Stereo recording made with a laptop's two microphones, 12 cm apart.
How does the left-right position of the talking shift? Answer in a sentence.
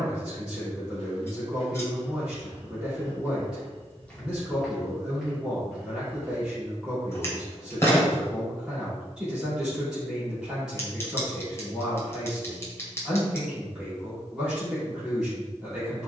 In this clip you hear the talking stay put.